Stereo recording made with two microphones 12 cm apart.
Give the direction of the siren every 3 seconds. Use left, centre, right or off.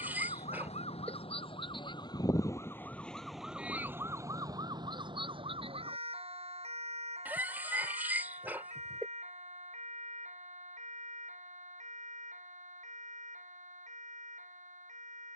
left, right, right, right, right.